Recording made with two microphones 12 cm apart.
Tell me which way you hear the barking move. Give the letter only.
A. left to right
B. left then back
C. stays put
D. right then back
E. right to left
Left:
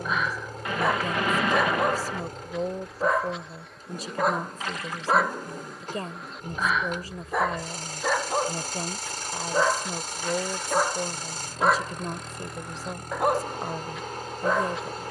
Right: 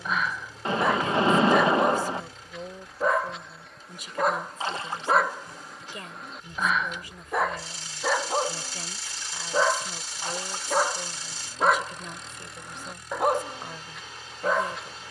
C.